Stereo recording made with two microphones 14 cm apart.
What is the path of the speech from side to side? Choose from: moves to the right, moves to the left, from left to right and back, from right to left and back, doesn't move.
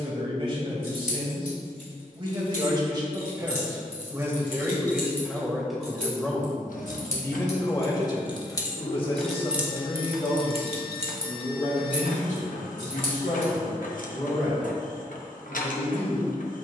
moves to the left.